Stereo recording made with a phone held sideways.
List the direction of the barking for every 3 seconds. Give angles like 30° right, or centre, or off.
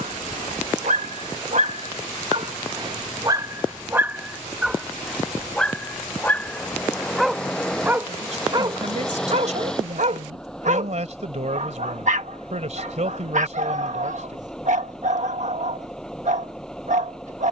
50° right, 10° right, 10° right, 60° right, 60° right, 60° right.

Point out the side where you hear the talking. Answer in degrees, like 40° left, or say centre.
60° right.